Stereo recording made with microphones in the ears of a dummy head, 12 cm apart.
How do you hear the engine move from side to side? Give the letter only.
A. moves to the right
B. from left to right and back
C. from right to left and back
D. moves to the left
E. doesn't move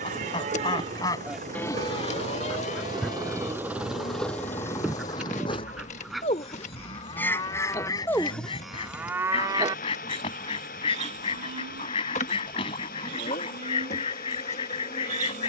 D.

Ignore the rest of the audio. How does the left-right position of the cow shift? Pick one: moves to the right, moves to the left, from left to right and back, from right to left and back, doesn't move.
from right to left and back.